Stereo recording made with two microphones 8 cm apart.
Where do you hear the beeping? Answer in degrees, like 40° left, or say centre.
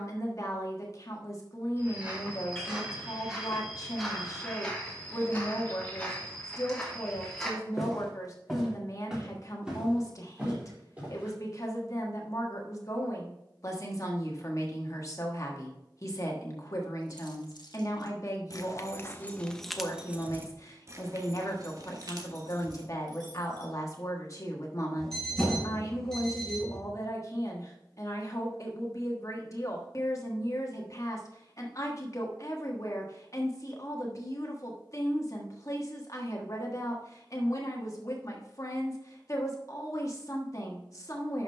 10° left.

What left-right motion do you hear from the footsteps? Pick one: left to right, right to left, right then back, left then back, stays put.
left then back.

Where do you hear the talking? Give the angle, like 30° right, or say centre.
40° left.